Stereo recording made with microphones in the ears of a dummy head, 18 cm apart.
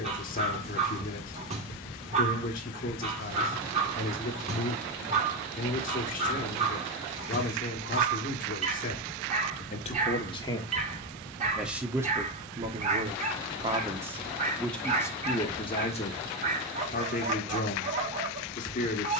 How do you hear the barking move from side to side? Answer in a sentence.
You can hear the barking stay put.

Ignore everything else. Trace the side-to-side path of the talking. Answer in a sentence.
In this clip you hear the talking move from left to right and back again.